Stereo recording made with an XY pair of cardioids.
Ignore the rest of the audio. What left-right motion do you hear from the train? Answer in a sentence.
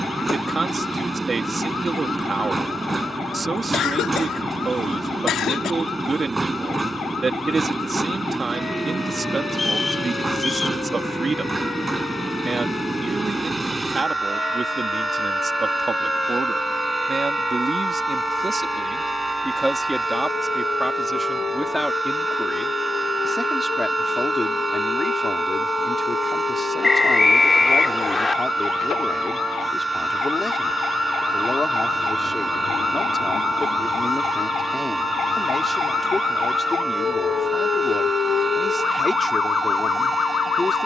In this clip you hear the train stay put.